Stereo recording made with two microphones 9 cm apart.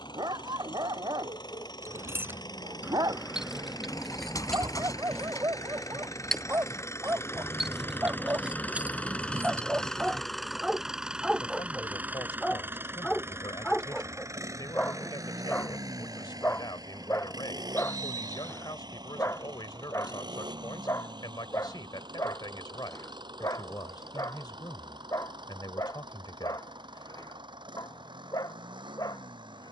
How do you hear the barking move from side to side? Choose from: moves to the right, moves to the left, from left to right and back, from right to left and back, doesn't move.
moves to the left.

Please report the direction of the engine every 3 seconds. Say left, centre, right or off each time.
left, left, left, centre, right, right, right, right, right, right.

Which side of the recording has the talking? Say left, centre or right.
left.